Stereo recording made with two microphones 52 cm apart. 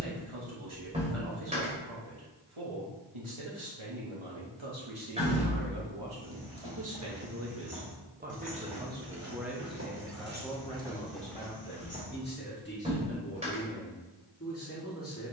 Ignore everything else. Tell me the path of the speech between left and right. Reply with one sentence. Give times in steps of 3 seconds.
You can hear the speech on the right from 0 s, in the centre from 9 s and on the left from 12 s.